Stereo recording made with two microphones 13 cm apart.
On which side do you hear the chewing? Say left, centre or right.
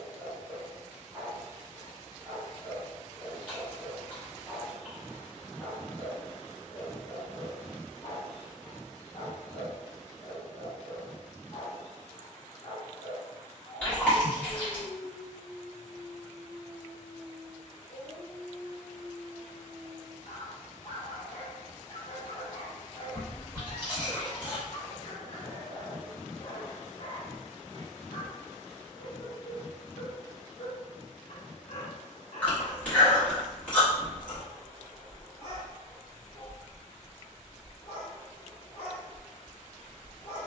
centre.